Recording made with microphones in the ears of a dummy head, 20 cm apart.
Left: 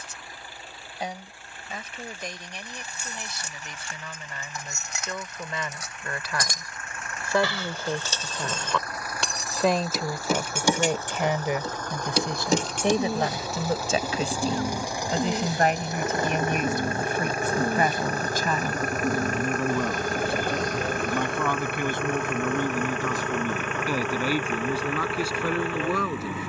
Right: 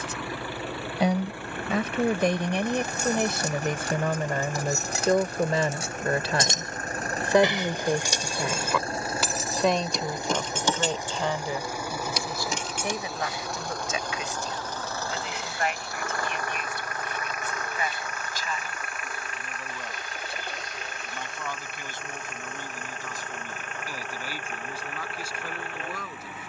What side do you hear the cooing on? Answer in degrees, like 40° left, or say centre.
40° left.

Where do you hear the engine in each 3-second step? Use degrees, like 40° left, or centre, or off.
50° right, 40° right, 30° right, 20° right, centre, 20° left, 40° left, 50° left, 60° left.